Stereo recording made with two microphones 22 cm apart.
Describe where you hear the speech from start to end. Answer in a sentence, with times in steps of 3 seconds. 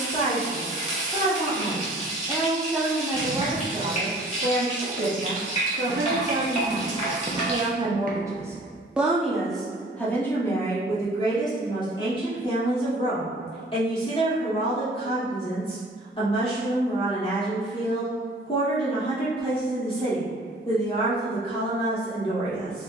In this clip you hear the speech in the centre from 0 s, on the right from 3 s, in the centre from 9 s and on the left from 12 s.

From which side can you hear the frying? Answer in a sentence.
In this clip you hear the frying on the left.